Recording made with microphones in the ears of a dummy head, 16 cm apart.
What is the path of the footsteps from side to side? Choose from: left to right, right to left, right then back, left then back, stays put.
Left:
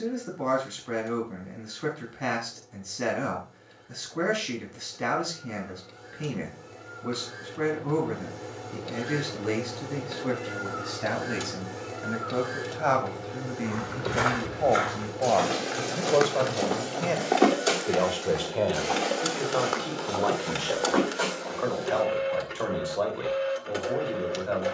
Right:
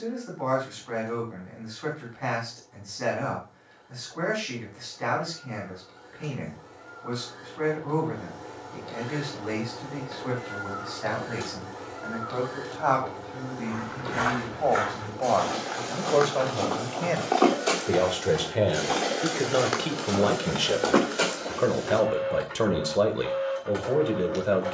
left to right.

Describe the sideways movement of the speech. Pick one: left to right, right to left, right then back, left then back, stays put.
left to right.